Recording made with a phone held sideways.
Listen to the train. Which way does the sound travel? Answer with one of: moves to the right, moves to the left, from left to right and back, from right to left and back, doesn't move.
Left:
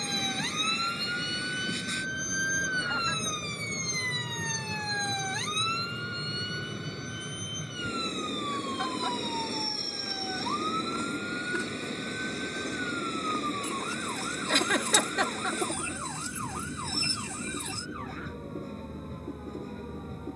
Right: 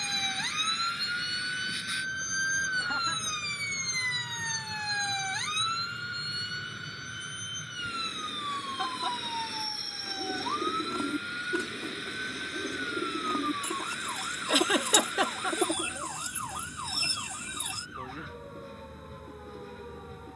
doesn't move.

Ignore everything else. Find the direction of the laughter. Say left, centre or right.
centre.